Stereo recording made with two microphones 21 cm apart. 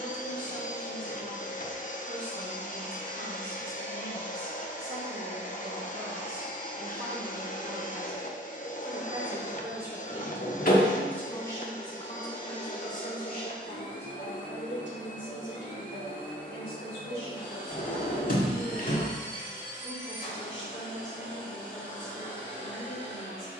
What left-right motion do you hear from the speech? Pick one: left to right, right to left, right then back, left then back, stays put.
right to left.